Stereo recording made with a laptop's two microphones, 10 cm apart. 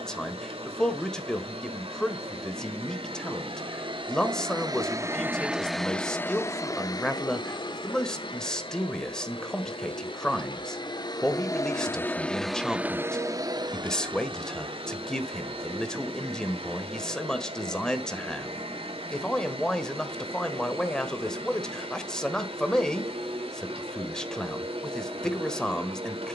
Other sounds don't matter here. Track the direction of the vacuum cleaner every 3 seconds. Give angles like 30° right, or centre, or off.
70° right, 40° right, 50° left, 50° left, 30° right, 70° right, 70° right, 70° right, 70° right.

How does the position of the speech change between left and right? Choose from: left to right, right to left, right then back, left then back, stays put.
stays put.